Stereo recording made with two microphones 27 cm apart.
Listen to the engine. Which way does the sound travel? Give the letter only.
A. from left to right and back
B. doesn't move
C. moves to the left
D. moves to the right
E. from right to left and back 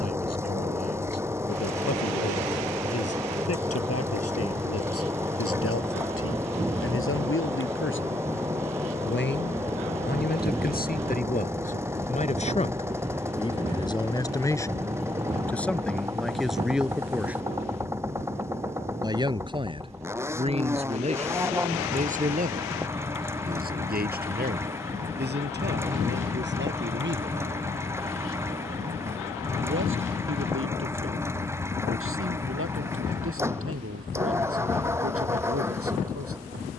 B.